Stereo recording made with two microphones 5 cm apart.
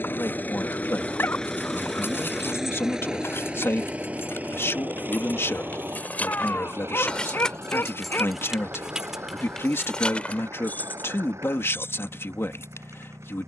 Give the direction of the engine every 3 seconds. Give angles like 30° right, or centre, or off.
10° left, 30° right, 50° right, 60° right, 60° right.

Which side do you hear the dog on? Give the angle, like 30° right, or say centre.
40° left.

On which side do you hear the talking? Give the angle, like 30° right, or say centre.
50° left.